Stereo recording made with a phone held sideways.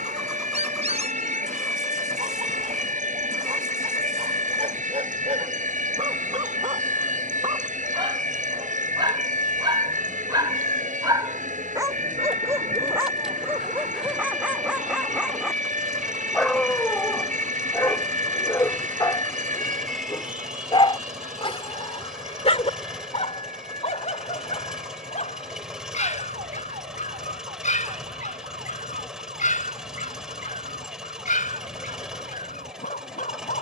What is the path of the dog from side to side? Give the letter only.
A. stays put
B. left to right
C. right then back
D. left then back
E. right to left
E.